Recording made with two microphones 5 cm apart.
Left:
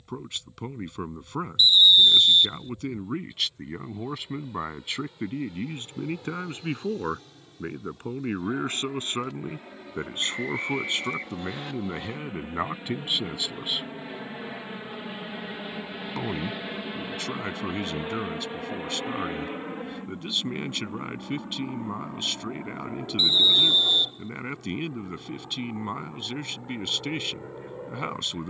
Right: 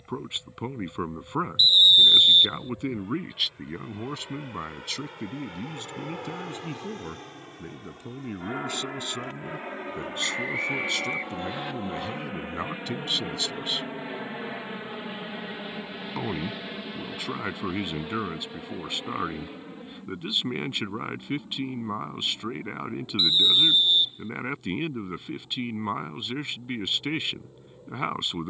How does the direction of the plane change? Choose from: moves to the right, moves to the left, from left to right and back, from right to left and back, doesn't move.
moves to the left.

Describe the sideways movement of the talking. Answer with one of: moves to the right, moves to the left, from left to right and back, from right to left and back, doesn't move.
from right to left and back.